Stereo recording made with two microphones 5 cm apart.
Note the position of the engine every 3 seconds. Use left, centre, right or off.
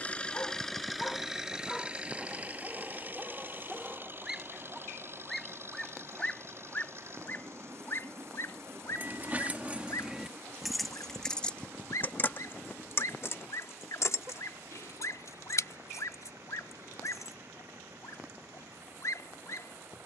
centre, right, right, right, right, right, right.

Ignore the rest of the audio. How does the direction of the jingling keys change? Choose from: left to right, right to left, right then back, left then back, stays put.
right to left.